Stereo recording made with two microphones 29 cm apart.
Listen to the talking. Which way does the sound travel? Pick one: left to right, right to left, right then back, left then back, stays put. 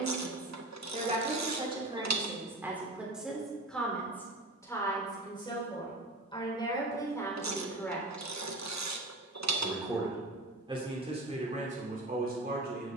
left then back.